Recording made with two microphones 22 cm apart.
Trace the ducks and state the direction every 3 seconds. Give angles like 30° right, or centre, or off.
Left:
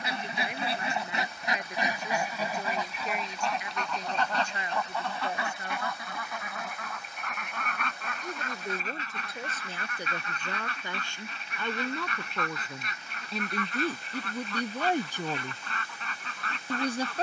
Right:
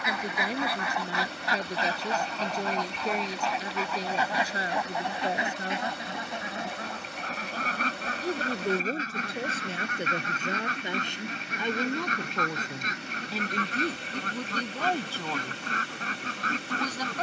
20° left, 10° right, 40° right, 40° right, 40° right, 40° right.